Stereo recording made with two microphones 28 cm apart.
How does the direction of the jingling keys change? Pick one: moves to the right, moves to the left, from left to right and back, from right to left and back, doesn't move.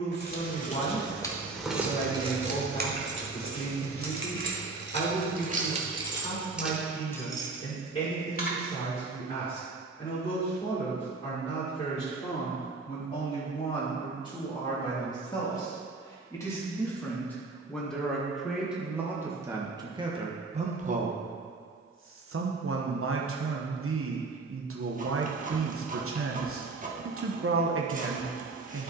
from left to right and back.